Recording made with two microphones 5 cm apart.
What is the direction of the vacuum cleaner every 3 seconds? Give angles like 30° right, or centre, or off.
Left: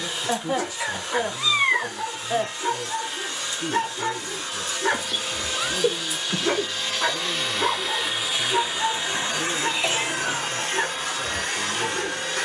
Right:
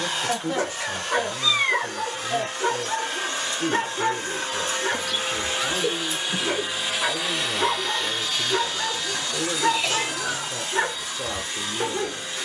50° right, 40° right, centre, 50° left.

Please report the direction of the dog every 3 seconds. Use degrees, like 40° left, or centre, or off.
50° right, 10° right, centre, 40° right.